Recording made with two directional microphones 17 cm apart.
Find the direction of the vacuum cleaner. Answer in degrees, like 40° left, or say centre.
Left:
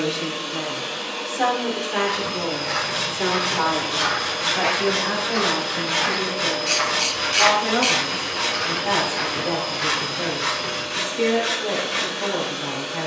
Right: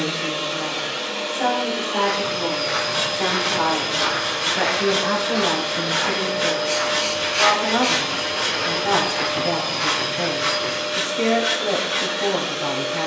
40° right.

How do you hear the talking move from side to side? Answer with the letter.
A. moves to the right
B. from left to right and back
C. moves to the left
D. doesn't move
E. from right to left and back
A.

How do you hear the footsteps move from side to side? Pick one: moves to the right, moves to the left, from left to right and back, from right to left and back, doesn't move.
from right to left and back.